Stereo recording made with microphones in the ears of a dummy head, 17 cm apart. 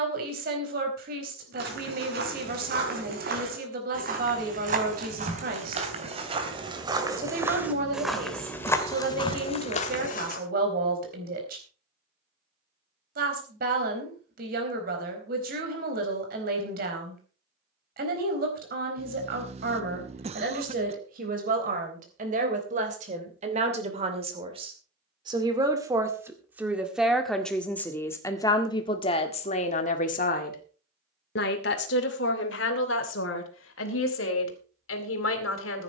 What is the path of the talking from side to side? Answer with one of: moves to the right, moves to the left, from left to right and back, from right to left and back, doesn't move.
moves to the left.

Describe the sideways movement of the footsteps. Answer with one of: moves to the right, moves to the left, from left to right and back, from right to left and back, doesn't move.
moves to the left.